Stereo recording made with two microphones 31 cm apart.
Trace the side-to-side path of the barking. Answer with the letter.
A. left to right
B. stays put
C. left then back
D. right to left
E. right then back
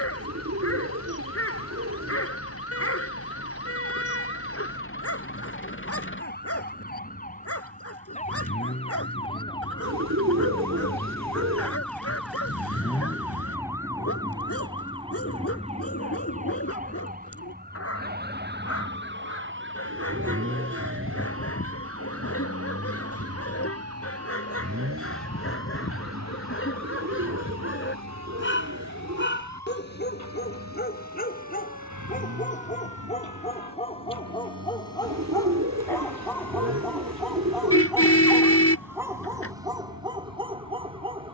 A.